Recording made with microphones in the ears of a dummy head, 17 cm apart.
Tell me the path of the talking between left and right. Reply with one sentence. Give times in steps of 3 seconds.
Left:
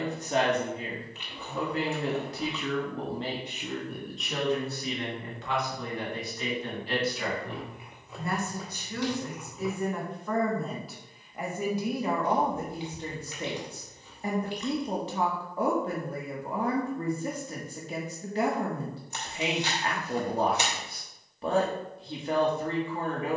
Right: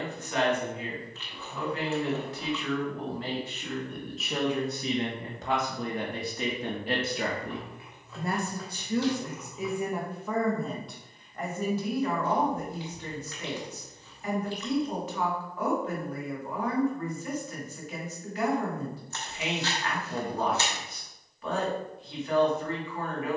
In this clip you hear the talking on the left from 0 s, in the centre from 3 s, on the right from 6 s, in the centre from 9 s and on the left from 12 s.